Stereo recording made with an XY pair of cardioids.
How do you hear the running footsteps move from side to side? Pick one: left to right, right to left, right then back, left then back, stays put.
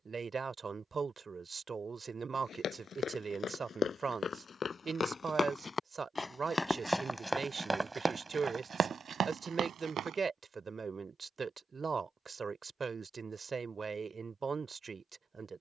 left to right.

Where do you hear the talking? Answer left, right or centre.
right.